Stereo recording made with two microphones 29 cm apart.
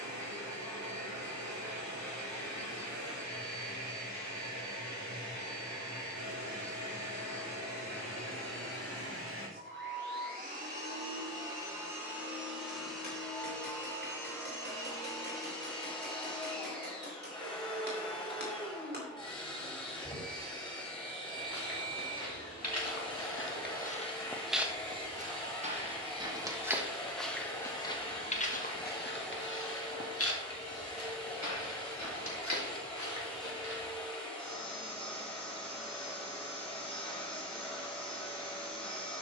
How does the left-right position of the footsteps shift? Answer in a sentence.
You can hear the footsteps move from left to right and back again.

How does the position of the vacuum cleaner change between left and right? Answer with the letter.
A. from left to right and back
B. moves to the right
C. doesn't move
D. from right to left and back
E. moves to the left
E.